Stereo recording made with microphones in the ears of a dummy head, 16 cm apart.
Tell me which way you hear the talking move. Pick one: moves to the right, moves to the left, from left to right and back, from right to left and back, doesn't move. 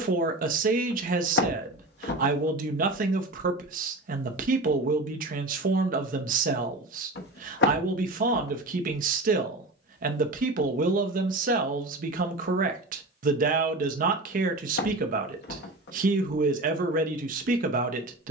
doesn't move.